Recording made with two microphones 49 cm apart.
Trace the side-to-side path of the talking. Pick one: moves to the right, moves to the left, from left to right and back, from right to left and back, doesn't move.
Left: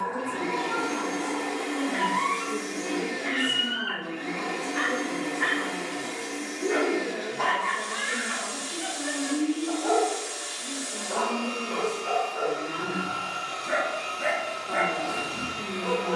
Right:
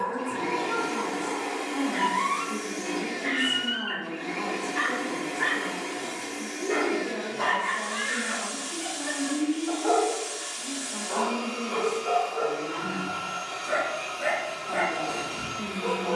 doesn't move.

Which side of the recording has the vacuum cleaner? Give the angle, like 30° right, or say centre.
10° right.